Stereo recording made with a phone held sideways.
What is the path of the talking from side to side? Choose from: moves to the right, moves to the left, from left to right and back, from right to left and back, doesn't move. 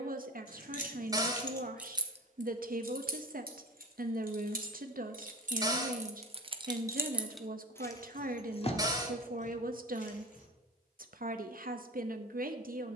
doesn't move.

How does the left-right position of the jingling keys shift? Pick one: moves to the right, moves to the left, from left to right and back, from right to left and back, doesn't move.
from left to right and back.